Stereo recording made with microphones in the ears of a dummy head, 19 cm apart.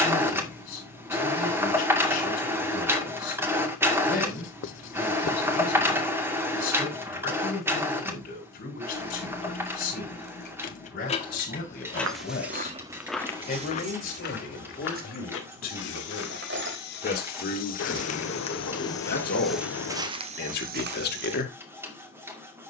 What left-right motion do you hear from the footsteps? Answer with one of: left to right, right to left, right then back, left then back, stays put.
left then back.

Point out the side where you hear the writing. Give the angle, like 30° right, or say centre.
60° left.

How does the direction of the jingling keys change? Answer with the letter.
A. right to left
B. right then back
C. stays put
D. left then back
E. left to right
E.